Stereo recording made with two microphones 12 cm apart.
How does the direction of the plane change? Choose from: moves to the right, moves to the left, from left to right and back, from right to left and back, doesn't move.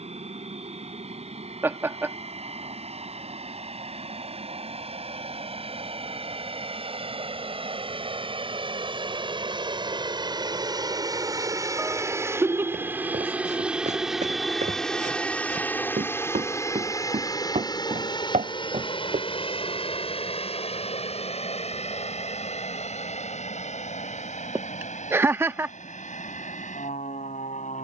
moves to the left.